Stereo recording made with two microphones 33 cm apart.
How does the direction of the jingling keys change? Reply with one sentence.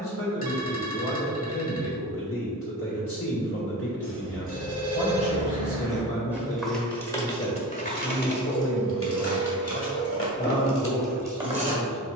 You can hear the jingling keys go left and come back.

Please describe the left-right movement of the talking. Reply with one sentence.
In this clip you hear the talking stay put.